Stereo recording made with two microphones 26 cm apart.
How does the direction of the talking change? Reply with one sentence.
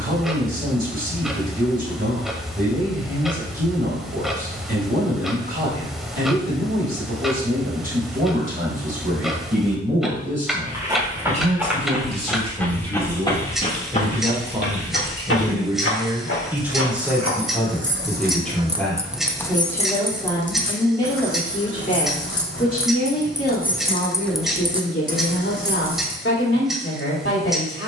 In this clip you hear the talking travel towards the left.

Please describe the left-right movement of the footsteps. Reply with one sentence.
In this clip you hear the footsteps move from right to left.